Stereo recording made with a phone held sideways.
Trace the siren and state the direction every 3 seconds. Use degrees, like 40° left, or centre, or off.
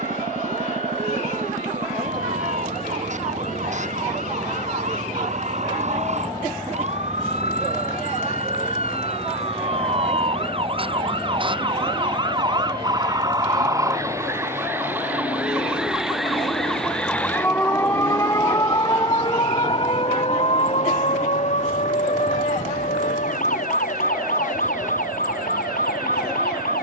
60° right, 50° right, 50° right, 40° right, 20° right, centre, 30° left, 50° left, 70° left.